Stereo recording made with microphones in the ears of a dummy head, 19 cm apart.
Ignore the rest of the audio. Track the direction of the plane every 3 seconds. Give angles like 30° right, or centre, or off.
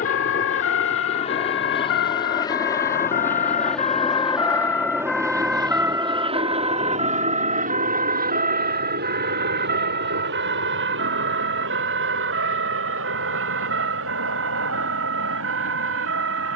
30° left, 10° right, 40° right, 60° right, 70° right, 70° right.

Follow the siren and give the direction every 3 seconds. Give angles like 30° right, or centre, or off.
60° left, 20° left, 30° right, 50° right, 60° right, 60° right.